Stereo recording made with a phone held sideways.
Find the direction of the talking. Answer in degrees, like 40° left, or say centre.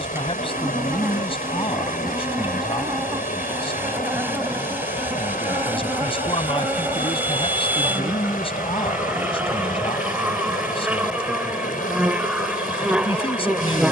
40° left.